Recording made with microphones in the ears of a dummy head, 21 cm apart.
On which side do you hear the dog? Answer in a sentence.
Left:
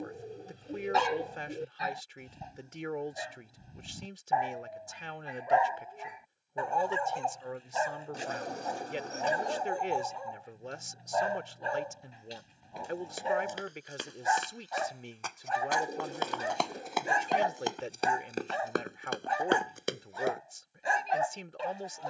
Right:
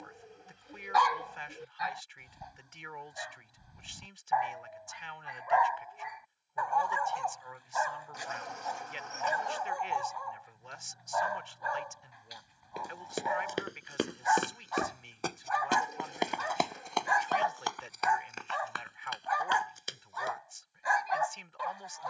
In this clip you hear the dog on the left.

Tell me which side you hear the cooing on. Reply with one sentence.
In this clip you hear the cooing on the left.